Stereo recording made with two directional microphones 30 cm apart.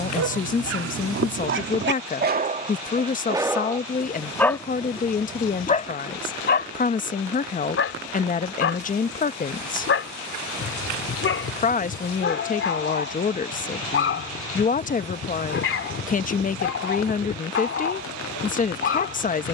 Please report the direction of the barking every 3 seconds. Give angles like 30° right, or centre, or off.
40° right, centre, 40° left, 40° left, 40° left, 40° left, 40° left.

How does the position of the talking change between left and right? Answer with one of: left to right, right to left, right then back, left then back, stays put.
stays put.